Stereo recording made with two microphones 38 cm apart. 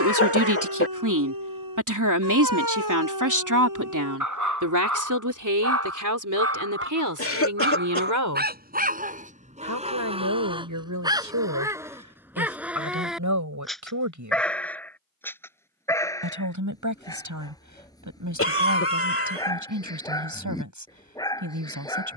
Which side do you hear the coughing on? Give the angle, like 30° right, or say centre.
40° left.